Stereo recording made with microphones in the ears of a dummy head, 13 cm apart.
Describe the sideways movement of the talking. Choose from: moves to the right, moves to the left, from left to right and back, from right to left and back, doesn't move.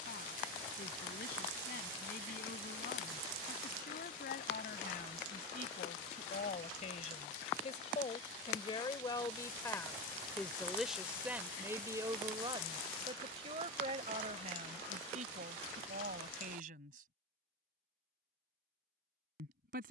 moves to the right.